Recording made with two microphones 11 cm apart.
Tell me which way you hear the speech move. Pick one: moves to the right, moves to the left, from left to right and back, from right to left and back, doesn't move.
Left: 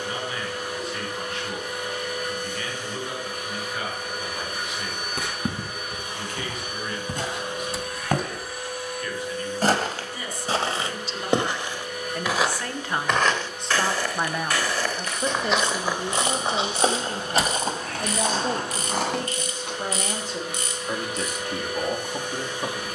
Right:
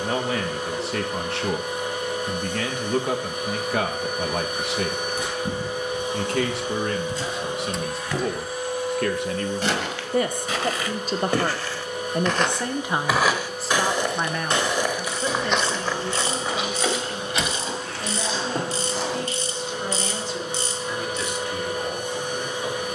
moves to the left.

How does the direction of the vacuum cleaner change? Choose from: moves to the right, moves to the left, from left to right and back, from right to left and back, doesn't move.
doesn't move.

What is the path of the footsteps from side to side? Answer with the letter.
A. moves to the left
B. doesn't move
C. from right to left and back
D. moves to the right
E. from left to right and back
E.